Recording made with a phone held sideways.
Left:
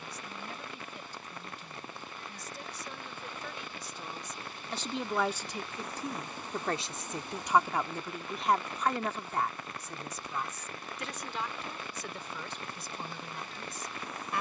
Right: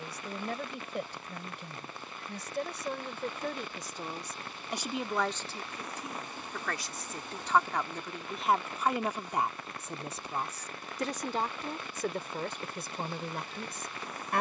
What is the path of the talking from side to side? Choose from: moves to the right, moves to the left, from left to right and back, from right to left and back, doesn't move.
from right to left and back.